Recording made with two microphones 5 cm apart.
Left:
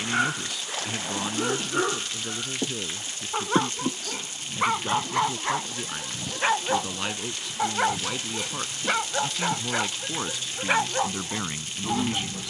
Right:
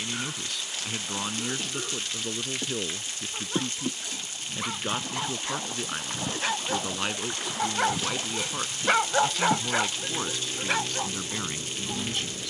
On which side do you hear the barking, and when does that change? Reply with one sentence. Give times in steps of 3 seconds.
You can hear the barking on the left from 0 s and in the centre from 6 s.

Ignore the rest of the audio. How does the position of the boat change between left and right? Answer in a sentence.
You can hear the boat move to the right.